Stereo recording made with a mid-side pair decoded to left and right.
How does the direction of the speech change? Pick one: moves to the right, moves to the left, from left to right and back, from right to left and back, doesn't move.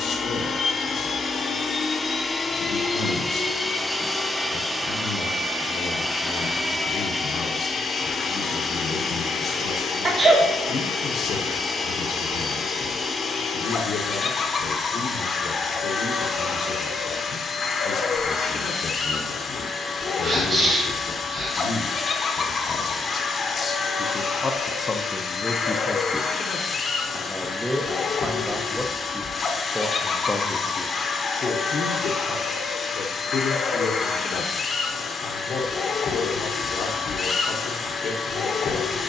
from left to right and back.